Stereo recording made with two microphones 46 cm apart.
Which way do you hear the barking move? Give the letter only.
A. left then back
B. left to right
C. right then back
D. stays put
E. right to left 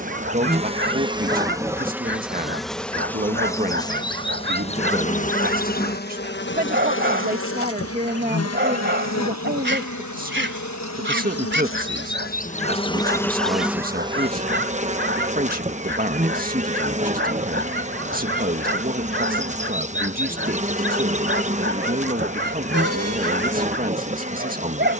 D.